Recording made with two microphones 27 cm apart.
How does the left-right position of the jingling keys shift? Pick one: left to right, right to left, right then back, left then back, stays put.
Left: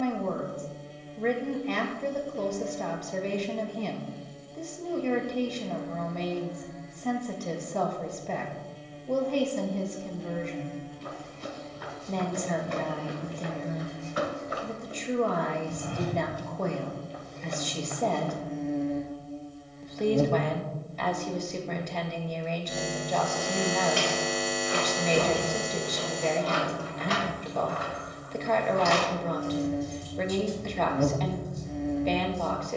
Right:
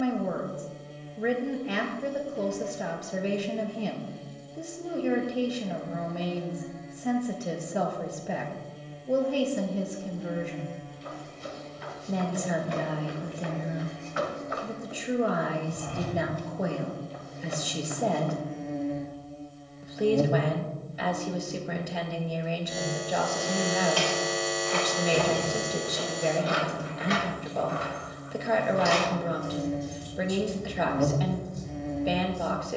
right then back.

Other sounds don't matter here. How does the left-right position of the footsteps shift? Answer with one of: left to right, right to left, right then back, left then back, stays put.
left to right.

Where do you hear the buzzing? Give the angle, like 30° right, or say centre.
centre.